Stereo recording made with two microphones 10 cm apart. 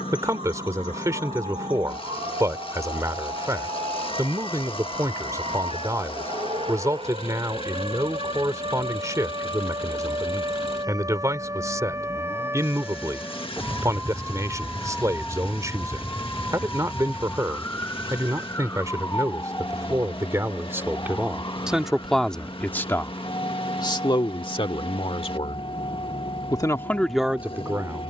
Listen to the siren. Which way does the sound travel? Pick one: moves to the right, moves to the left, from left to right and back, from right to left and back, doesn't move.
moves to the left.